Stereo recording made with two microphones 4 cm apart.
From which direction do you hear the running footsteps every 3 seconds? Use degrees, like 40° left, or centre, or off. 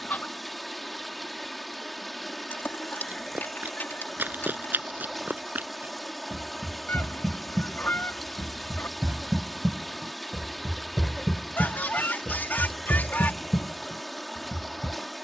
off, 50° right, 40° right, 10° right, 60° left.